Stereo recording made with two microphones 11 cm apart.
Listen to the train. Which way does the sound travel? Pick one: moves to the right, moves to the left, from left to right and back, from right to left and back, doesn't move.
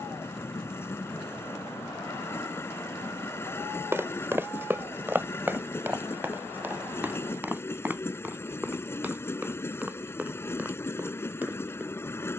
doesn't move.